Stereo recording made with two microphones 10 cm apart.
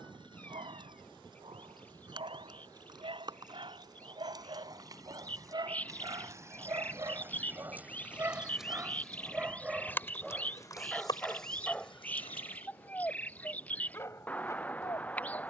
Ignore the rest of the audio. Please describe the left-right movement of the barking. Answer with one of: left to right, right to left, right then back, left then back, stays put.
right to left.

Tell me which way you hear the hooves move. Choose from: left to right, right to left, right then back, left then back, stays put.
right to left.